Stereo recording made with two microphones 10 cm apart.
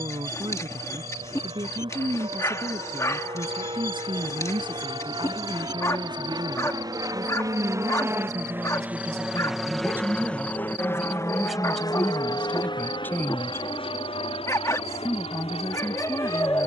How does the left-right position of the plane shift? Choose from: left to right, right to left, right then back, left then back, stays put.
right to left.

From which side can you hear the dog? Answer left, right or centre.
left.